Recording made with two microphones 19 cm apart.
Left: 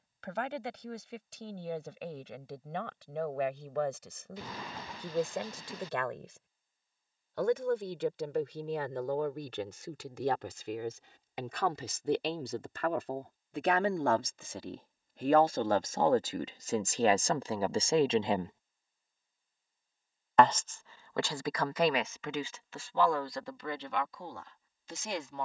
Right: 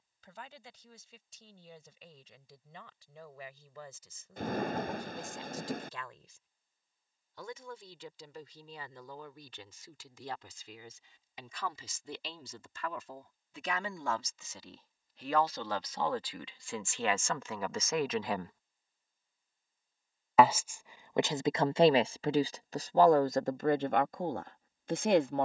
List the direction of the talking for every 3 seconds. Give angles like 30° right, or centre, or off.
80° left, 70° left, 70° left, 70° left, 60° left, 40° left, 10° left, 40° right, 60° right.